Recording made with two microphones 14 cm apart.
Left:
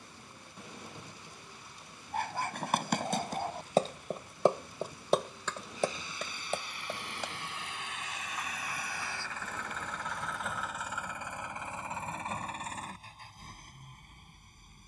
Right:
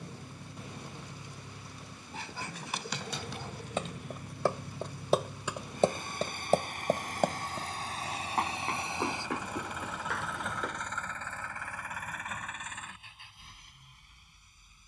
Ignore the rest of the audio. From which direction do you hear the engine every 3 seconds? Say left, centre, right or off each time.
right, right, right, centre, left.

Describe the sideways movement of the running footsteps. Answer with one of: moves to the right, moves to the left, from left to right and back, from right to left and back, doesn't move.
moves to the right.